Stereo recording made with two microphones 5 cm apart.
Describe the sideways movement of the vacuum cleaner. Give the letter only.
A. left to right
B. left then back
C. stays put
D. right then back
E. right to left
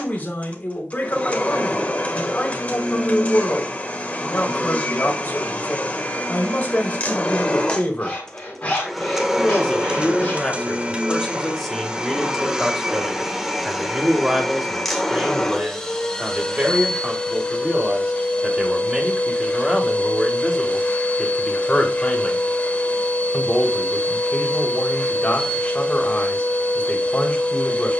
D.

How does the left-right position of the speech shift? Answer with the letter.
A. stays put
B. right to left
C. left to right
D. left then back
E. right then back
E.